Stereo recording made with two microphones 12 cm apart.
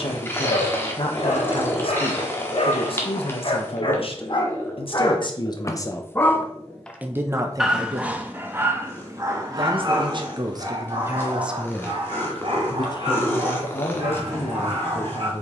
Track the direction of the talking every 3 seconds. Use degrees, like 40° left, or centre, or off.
50° left, 50° left, 30° right, 30° right, 50° left.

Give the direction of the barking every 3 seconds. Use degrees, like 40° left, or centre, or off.
60° left, 40° left, 10° right, 40° right, 60° right.